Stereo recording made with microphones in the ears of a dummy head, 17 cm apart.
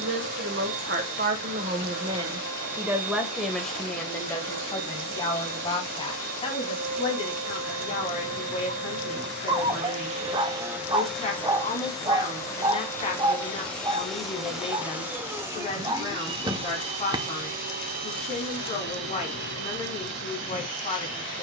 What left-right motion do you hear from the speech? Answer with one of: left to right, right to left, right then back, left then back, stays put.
right to left.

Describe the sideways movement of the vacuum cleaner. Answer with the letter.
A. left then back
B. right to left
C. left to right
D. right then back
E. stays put
A.